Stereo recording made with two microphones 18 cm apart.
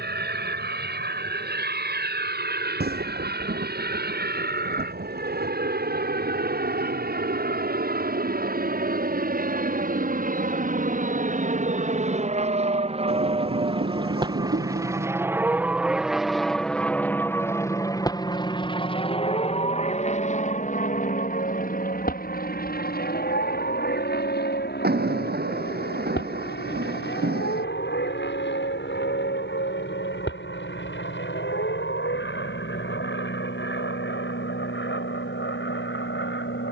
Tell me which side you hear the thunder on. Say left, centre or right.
right.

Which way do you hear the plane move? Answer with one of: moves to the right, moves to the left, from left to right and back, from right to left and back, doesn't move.
moves to the left.